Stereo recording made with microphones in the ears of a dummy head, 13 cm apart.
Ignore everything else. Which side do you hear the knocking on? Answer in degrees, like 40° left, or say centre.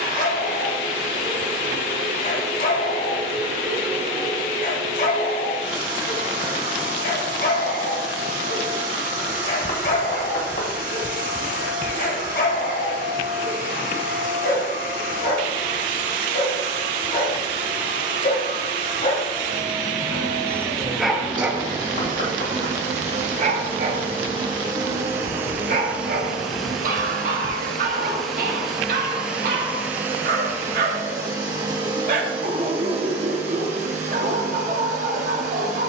60° left.